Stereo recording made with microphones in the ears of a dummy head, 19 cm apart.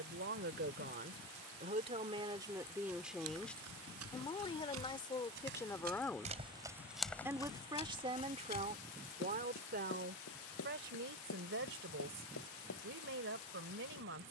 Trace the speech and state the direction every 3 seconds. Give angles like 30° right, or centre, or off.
40° right, 10° left, 20° right, 50° right, 60° right.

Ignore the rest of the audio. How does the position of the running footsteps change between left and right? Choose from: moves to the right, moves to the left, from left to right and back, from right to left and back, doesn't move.
moves to the left.